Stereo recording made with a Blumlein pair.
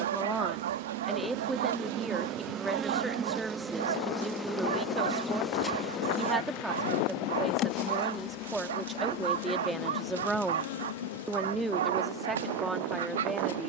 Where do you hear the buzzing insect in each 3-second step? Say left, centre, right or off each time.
right, centre, left, left, left.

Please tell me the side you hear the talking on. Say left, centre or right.
centre.